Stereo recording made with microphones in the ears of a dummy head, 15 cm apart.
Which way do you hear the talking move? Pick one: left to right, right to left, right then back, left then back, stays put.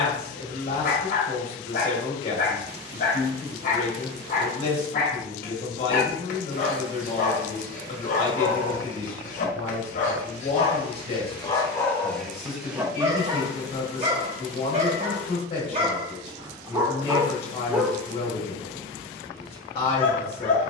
stays put.